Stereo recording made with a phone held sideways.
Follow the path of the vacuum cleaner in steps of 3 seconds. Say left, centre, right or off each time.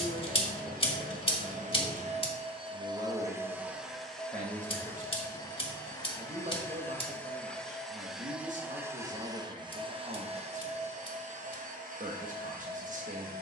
right, centre, centre, right, right.